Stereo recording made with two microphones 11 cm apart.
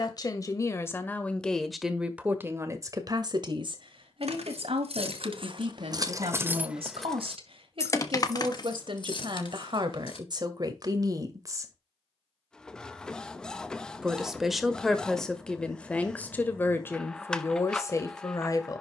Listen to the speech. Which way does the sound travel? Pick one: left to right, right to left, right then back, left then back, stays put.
right then back.